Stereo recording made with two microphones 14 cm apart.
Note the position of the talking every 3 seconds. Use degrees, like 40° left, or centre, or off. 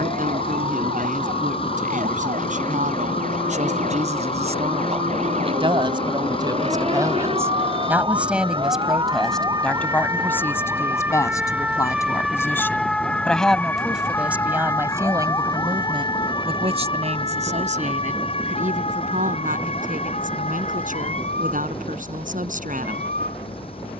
70° right, 50° right, 20° right, 10° left, centre, 40° right, 70° right, 70° right.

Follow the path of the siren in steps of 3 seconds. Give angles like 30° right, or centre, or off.
70° right, 60° right, 40° right, 20° right, 10° left, 30° left, 40° left, 50° left.